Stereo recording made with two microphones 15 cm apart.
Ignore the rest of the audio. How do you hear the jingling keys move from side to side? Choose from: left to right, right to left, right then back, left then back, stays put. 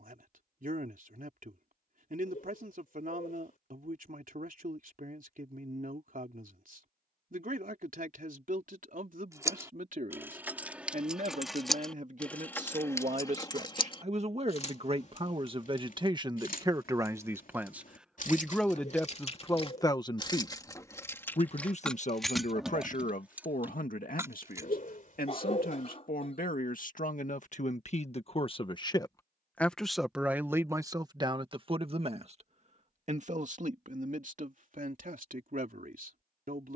left then back.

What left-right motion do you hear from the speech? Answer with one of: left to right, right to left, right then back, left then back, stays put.
left then back.